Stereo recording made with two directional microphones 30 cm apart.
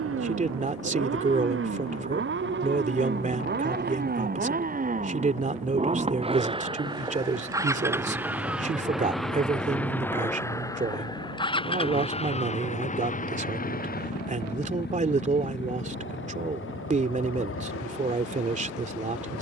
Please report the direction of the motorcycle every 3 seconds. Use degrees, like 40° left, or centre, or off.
40° right, 30° right, 10° right, 10° left, 30° left, 40° left, 50° left.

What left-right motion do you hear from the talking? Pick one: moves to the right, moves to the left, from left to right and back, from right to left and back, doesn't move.
doesn't move.